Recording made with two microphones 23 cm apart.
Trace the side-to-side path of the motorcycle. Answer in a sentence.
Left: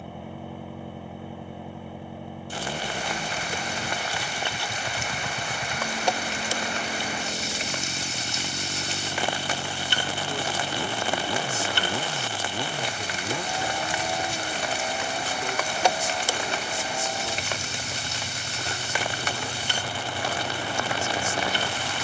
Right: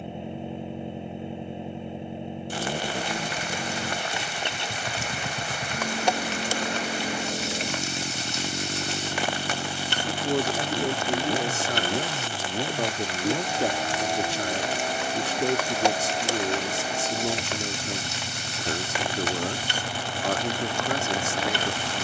You can hear the motorcycle stay in one place.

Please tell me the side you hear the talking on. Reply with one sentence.
In this clip you hear the talking on the right.